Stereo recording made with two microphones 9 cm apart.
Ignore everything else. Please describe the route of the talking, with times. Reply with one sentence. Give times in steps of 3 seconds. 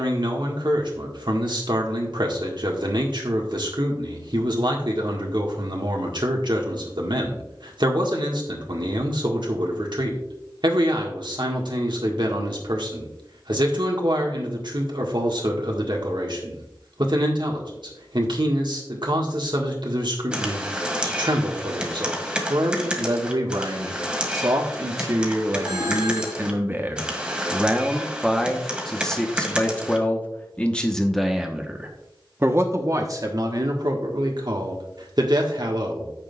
In this clip you hear the talking on the right from 0 s, in the centre from 27 s and on the right from 33 s.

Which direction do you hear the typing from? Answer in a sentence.
In this clip you hear the typing in the centre.